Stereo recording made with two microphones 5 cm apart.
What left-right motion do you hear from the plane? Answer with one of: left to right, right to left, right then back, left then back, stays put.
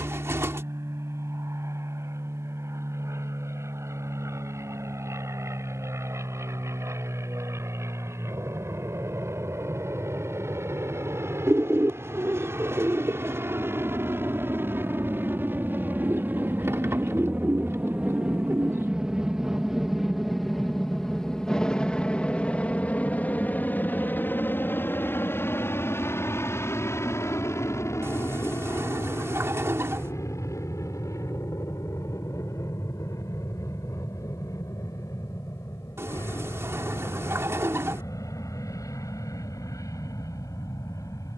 right to left.